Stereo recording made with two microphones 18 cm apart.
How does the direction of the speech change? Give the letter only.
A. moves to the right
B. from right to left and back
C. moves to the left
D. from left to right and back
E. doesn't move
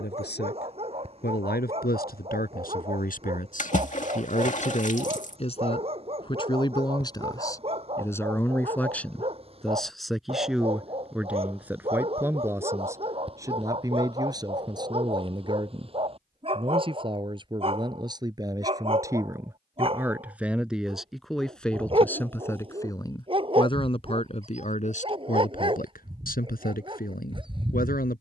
D.